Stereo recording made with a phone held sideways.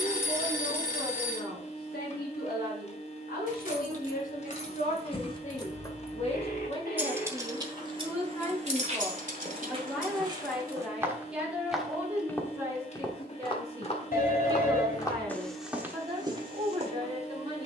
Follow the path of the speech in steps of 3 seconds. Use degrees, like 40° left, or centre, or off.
70° left, 50° left, 30° left, centre, 20° right, 30° right.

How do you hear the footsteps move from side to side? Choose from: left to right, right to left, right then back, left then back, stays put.
left then back.